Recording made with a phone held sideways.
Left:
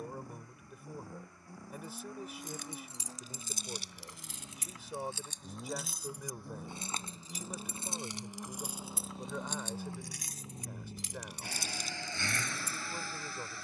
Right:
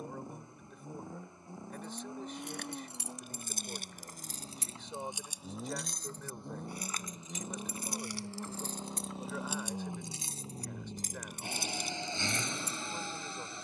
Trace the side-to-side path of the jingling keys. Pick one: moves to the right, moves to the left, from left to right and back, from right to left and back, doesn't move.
from right to left and back.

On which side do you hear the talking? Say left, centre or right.
centre.